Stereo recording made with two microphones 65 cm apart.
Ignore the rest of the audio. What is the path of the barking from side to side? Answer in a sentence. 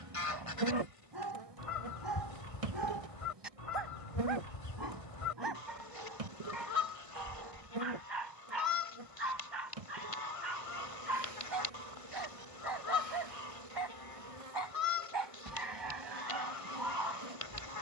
In this clip you hear the barking stay put.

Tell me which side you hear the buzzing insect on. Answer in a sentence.
You can hear the buzzing insect on the right.